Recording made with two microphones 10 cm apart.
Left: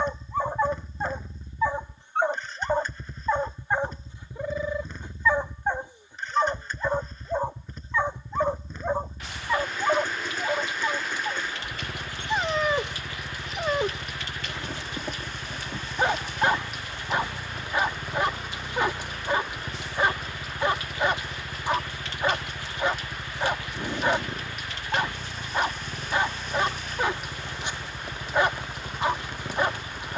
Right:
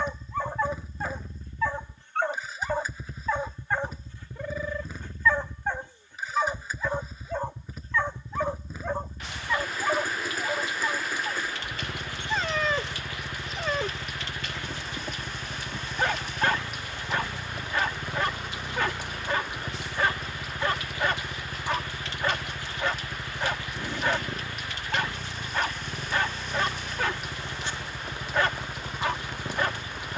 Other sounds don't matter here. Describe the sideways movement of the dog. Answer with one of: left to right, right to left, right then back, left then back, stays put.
stays put.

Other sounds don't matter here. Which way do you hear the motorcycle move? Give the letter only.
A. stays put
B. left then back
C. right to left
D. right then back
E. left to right
A.